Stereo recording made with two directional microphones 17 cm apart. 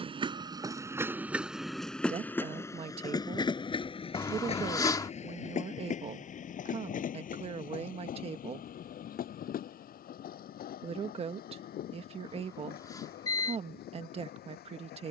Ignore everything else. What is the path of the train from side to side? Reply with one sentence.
In this clip you hear the train move from right to left.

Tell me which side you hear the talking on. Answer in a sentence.
In this clip you hear the talking on the right.